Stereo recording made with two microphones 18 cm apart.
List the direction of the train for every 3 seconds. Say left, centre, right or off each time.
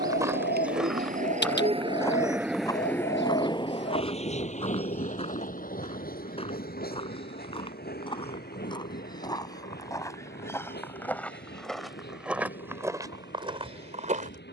right, left, left, left, left.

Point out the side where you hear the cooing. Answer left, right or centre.
left.